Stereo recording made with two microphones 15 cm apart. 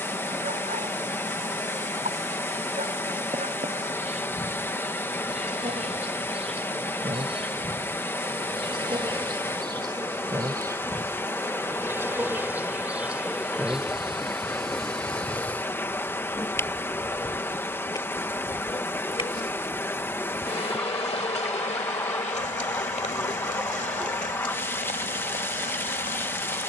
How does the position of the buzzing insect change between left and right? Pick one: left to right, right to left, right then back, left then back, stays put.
right to left.